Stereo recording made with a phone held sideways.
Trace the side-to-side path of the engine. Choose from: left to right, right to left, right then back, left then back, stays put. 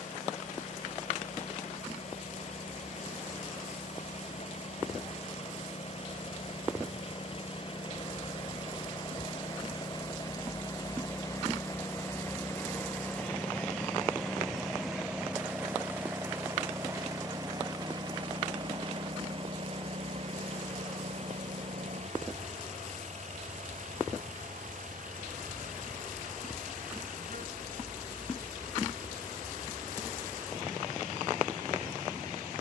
left to right.